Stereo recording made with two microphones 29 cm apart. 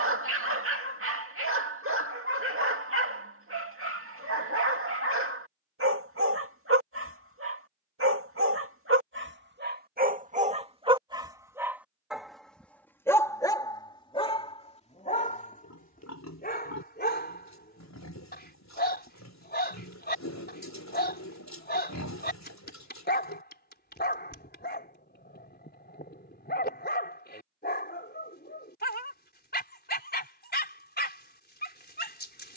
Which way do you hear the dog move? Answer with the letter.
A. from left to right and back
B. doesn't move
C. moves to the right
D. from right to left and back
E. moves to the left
E.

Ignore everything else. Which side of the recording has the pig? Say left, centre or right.
left.